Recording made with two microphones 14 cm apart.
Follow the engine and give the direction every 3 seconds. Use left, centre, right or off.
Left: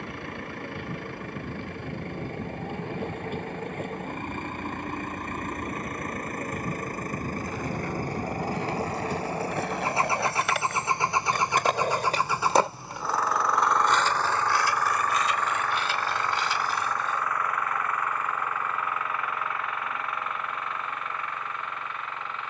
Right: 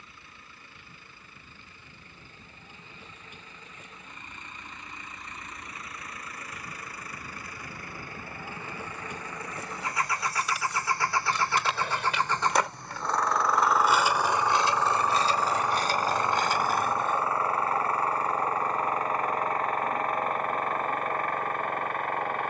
left, left, left, left, centre, right, right, right.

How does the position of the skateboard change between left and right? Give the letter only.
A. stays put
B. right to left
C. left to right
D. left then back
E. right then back
C.